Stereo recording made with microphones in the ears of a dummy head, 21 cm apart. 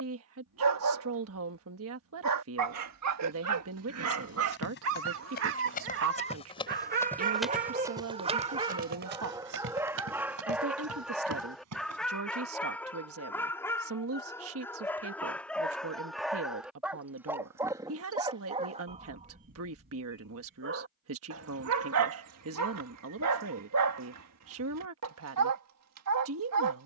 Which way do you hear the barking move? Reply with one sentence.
You can hear the barking move from right to left and back again.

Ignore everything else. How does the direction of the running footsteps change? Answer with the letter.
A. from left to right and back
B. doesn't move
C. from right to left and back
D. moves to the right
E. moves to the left
D.